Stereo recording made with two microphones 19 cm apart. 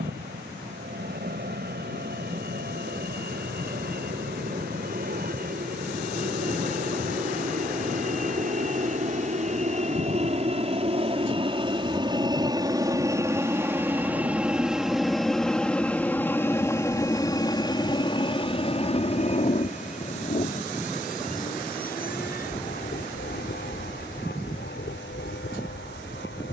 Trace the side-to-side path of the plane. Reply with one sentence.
In this clip you hear the plane move to the left.